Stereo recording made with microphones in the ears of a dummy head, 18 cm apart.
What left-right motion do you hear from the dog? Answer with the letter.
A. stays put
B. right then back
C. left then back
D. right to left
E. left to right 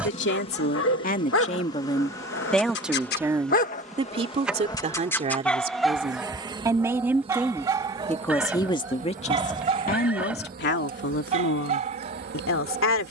E.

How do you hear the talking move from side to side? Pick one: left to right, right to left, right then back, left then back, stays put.
right then back.